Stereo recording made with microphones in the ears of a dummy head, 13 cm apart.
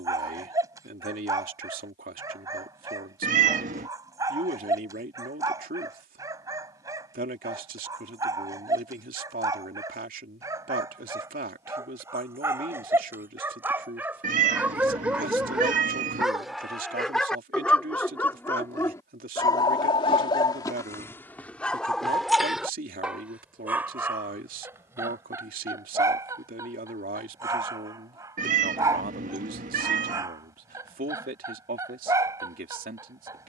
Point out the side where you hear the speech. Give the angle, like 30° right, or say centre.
60° right.